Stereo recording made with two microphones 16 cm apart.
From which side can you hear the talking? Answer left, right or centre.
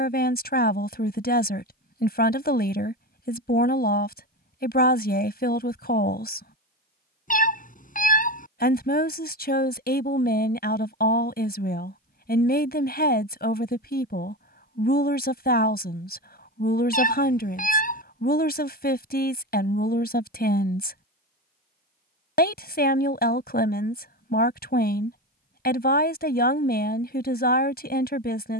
left.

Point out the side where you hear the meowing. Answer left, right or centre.
left.